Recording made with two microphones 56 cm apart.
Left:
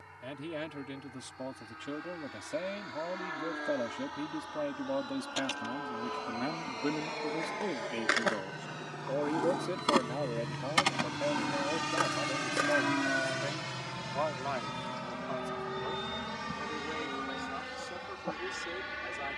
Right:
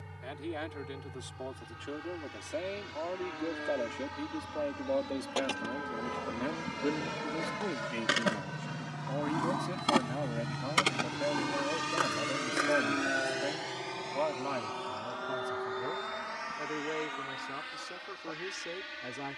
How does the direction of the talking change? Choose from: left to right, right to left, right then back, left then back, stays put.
left to right.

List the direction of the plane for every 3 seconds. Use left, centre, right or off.
right, right, right, centre, left, left, left.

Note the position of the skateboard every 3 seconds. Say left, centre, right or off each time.
off, right, right, centre, left, off, off.